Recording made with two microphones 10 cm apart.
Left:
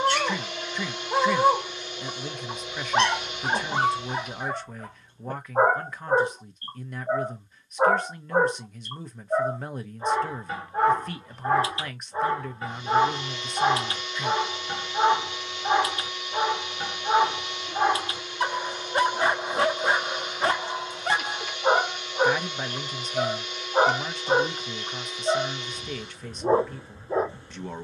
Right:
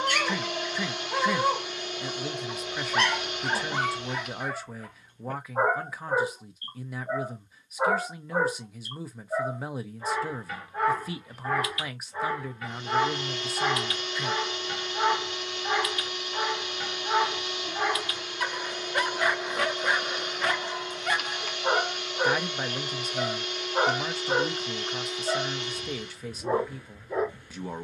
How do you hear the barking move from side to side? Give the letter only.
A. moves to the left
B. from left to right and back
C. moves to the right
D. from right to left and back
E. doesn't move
E.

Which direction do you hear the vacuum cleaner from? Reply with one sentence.
You can hear the vacuum cleaner on the right.